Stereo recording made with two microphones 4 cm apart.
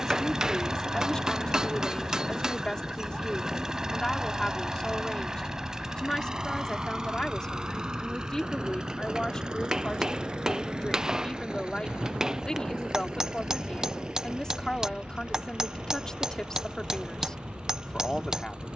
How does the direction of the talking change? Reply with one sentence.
In this clip you hear the talking stay put.